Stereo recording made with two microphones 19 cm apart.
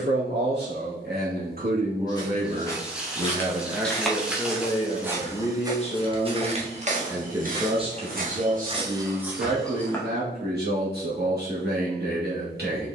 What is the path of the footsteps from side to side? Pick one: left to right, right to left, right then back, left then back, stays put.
right then back.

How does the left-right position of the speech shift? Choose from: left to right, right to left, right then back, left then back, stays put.
left then back.